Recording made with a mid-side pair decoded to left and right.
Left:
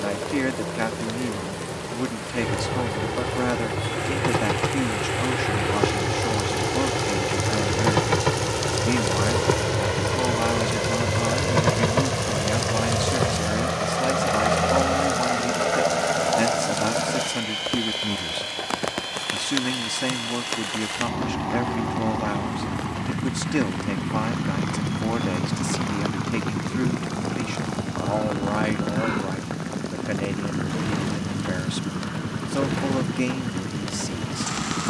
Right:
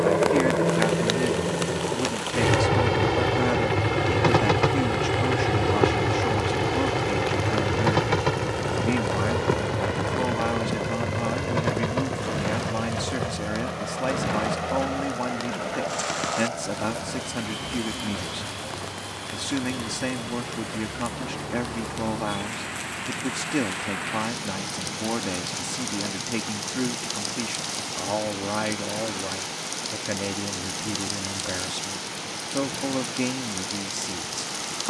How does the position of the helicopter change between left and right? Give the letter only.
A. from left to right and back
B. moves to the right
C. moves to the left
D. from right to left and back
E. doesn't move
C.